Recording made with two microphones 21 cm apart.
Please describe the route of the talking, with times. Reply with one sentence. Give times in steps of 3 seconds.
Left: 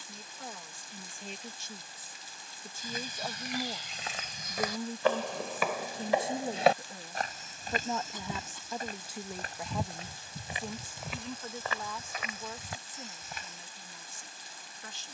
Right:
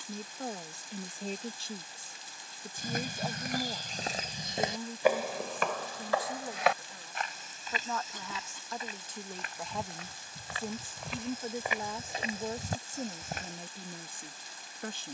In this clip you hear the talking on the right from 0 s, in the centre from 3 s, on the left from 6 s, in the centre from 9 s and on the right from 12 s.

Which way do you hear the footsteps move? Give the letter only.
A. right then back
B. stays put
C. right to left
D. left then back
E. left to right
D.